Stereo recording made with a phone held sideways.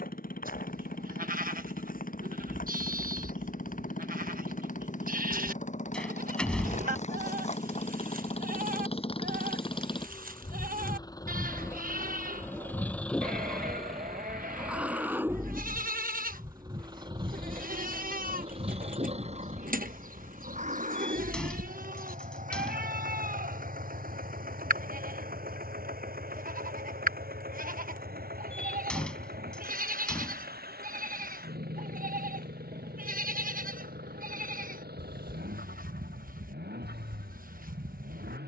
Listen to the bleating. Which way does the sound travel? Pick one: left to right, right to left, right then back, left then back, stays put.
stays put.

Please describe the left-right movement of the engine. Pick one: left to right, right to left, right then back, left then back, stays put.
left to right.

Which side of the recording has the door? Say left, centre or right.
centre.